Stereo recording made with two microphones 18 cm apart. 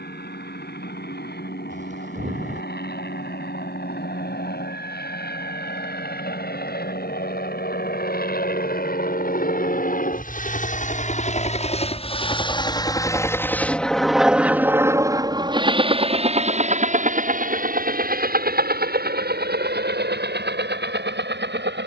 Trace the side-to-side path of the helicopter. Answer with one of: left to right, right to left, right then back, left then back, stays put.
left to right.